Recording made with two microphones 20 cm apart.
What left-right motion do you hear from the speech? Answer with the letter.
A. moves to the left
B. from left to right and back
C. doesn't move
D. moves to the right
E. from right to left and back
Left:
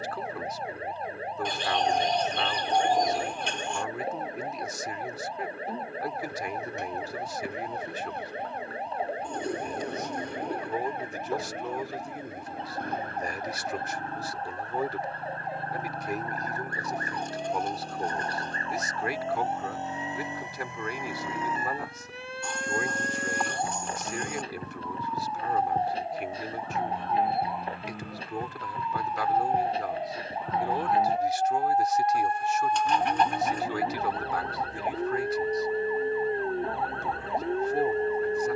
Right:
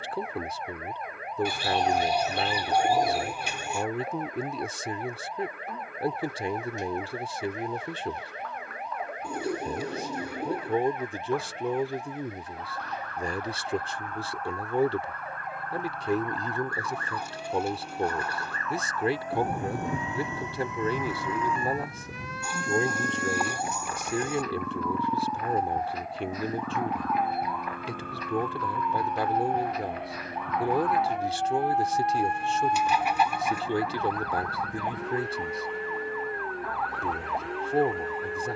C.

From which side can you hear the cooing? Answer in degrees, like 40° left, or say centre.
10° right.